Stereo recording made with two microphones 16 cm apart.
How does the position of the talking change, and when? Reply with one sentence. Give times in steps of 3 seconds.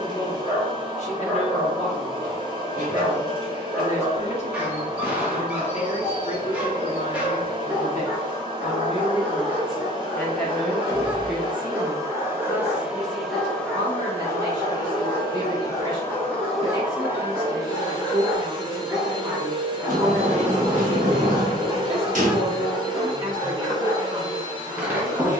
You can hear the talking on the left from 0 s, in the centre from 9 s and on the right from 12 s.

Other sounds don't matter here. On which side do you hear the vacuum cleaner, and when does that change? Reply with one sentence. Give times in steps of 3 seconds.
In this clip you hear the vacuum cleaner on the right from 0 s, in the centre from 12 s and on the right from 18 s.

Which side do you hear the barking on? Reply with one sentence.
In this clip you hear the barking in the centre.